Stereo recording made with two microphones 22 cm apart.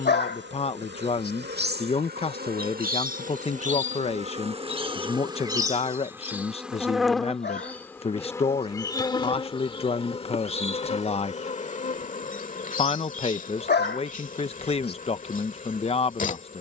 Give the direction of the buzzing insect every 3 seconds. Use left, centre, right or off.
right, right, centre, left, left, left.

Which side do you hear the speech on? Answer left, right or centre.
left.